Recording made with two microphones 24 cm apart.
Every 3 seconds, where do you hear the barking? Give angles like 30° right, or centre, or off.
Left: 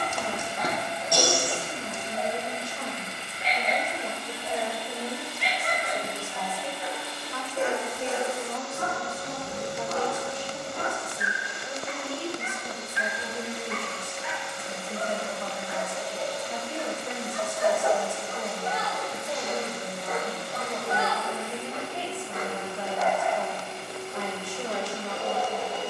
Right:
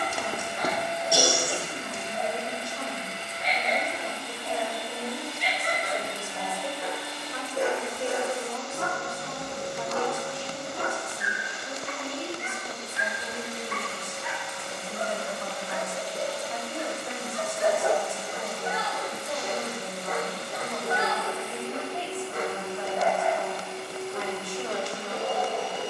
40° right, 40° right, 40° right, 40° right, 40° right, 30° right, 10° right, 30° right, 40° right.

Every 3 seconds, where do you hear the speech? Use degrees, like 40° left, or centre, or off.
30° left, 20° left, 10° right, 20° left, 30° left, 30° left, 30° left, 30° left, 30° left.